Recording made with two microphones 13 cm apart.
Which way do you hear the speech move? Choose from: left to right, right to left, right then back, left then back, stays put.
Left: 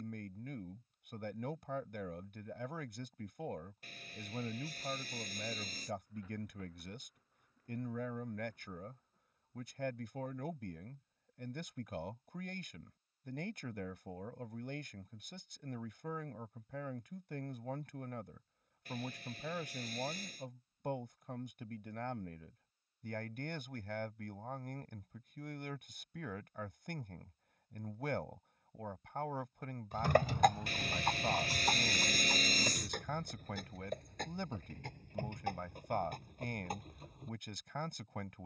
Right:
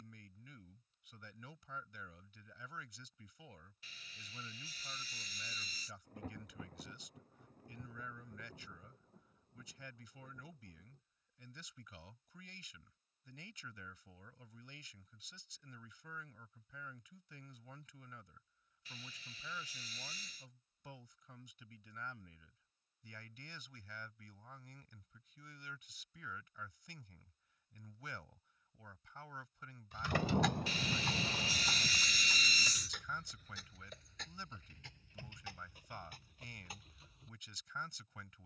stays put.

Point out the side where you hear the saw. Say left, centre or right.
left.